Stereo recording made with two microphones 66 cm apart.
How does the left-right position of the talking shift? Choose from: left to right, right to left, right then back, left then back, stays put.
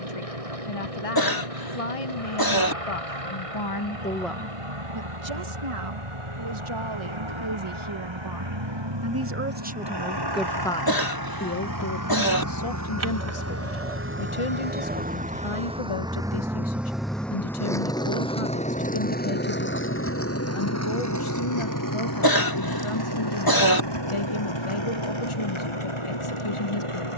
right then back.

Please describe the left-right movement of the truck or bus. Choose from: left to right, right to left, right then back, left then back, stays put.
right to left.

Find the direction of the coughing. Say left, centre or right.
left.